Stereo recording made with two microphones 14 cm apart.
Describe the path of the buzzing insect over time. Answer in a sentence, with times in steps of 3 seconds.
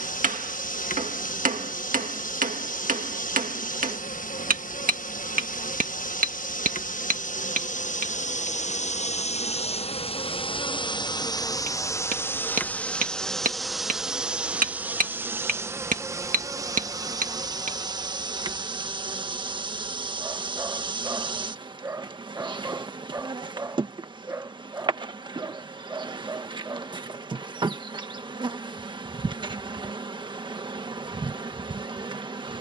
You can hear the buzzing insect on the left from 0 s, in the centre from 12 s and on the right from 15 s.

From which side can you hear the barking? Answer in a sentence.
In this clip you hear the barking on the right.